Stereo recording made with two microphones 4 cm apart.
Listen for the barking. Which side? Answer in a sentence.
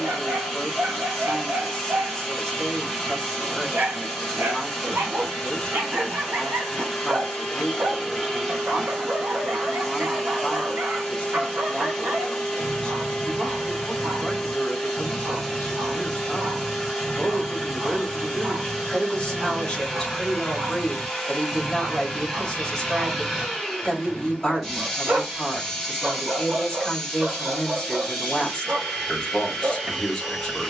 In this clip you hear the barking on the right.